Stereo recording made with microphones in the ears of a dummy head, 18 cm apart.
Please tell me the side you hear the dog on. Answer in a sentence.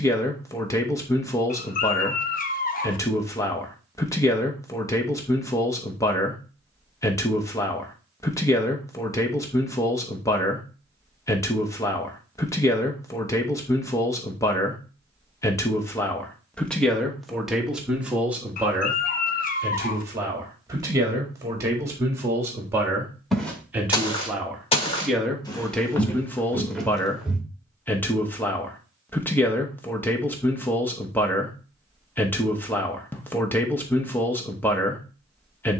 In this clip you hear the dog on the left.